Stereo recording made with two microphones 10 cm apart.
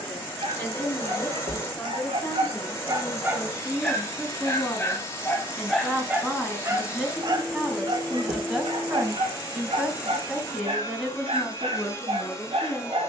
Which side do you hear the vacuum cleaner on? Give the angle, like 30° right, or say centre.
30° left.